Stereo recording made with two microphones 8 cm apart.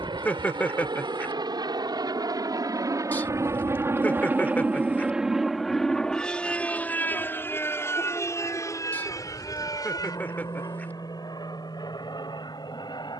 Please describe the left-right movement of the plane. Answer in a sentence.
You can hear the plane go from the right side to the left.